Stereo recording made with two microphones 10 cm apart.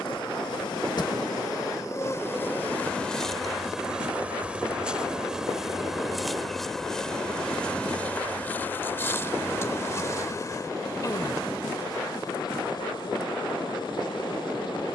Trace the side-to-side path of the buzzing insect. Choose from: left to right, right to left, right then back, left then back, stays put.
right then back.